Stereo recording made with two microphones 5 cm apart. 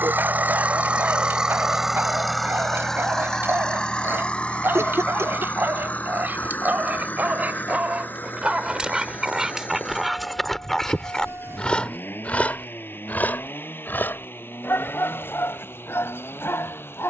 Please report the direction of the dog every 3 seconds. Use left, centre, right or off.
right, right, right, centre, left, left.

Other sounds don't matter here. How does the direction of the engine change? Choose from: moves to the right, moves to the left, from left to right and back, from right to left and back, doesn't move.
moves to the left.